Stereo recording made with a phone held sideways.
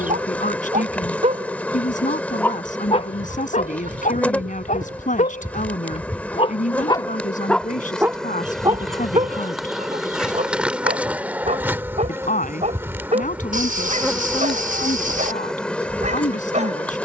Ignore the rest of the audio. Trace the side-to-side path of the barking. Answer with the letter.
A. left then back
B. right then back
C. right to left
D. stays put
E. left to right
A.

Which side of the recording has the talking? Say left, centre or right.
left.